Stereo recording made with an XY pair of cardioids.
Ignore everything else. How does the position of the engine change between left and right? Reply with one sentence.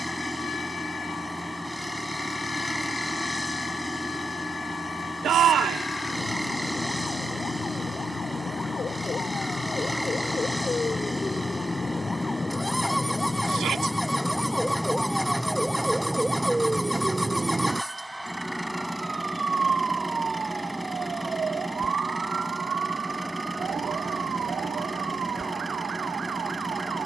You can hear the engine stay put.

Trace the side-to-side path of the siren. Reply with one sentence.
In this clip you hear the siren travel towards the right.